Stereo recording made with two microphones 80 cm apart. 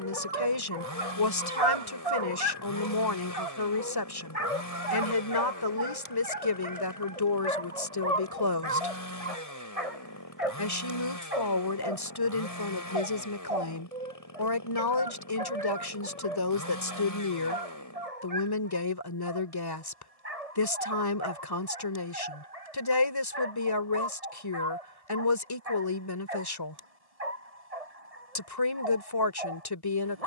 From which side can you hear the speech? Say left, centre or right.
left.